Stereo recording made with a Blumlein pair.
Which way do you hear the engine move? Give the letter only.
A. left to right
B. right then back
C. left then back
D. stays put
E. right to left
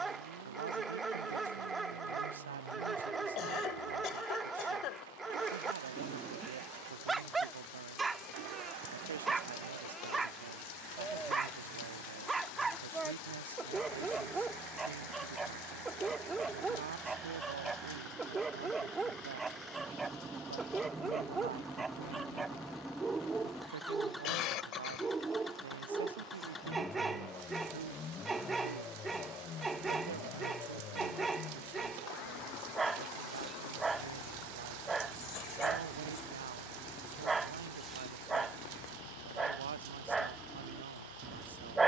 E.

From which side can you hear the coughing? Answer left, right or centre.
left.